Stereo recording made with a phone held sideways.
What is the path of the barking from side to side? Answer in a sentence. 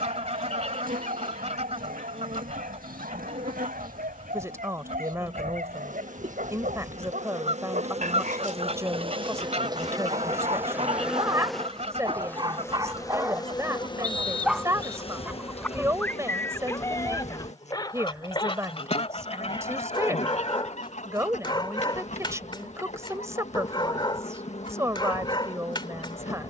In this clip you hear the barking move to the left.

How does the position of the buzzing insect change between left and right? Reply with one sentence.
You can hear the buzzing insect move from right to left.